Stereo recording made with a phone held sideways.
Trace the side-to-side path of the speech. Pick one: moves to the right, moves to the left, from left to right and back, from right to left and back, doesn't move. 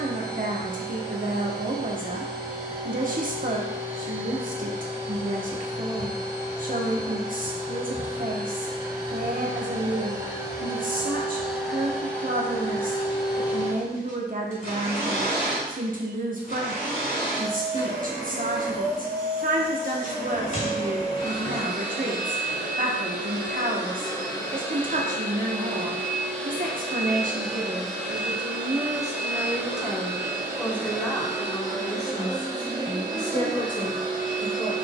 moves to the left.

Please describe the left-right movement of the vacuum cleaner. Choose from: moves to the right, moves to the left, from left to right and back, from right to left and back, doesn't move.
from right to left and back.